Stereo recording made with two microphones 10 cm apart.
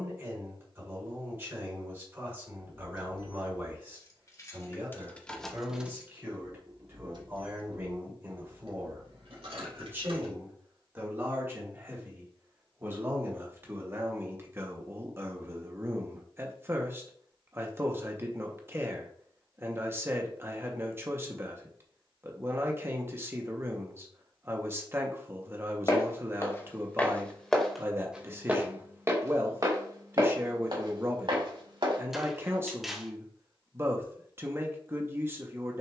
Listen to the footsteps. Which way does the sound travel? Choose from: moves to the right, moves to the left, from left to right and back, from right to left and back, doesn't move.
moves to the right.